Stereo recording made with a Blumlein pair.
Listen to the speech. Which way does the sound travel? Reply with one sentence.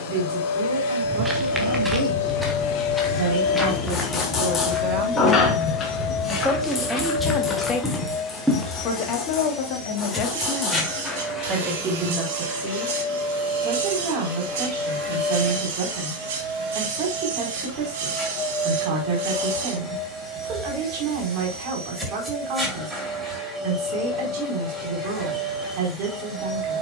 You can hear the speech go left and come back.